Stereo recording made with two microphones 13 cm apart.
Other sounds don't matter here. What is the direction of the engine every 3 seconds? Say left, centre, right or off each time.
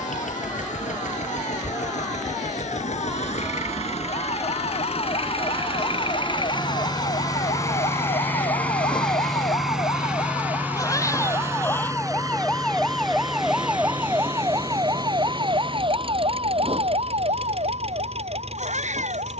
left, left, left, centre, right, right, right.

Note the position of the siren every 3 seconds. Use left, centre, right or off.
left, left, left, left, centre, right, right.